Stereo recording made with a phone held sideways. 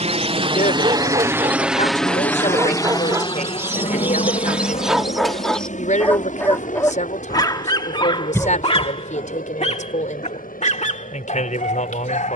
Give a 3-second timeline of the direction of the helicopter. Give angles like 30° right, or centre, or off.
10° right, 40° left, 60° left, 70° left.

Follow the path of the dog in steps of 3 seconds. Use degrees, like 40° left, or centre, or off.
40° right, 10° right, 30° left, 50° left.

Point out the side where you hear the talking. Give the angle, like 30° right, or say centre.
60° left.